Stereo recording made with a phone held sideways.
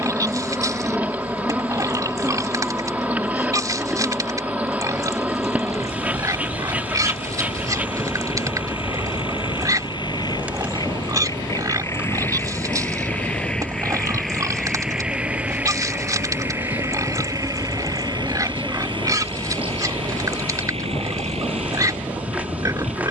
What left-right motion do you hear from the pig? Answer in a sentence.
In this clip you hear the pig stay put.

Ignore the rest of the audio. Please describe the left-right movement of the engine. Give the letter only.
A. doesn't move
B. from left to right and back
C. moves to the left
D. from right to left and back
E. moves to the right
E.